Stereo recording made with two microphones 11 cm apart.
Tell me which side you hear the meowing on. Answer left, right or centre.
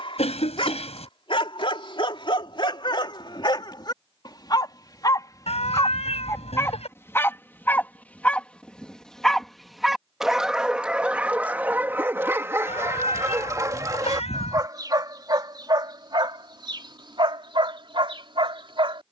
left.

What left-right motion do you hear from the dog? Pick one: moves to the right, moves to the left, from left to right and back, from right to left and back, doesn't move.
moves to the right.